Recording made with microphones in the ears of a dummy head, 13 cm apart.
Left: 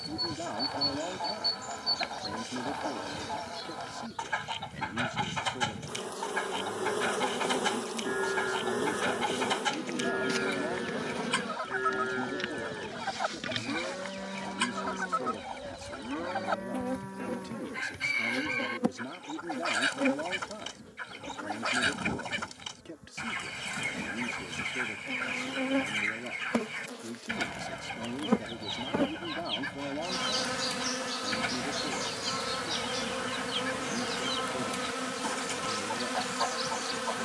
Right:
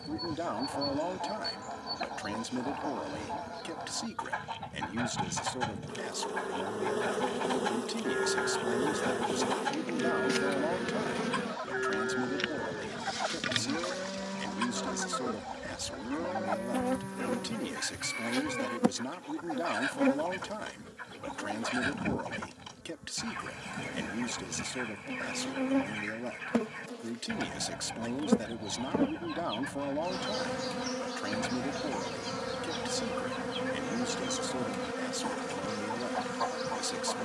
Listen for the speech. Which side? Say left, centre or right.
right.